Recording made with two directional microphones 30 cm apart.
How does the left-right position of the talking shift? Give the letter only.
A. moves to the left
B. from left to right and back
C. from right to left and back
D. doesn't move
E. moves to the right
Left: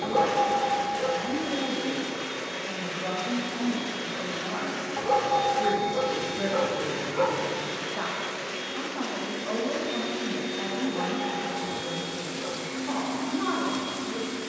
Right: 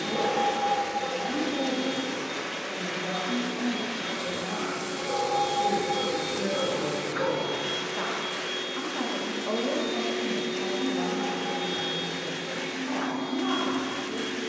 B.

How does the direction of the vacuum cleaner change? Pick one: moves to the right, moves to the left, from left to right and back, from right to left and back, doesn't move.
doesn't move.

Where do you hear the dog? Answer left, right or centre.
left.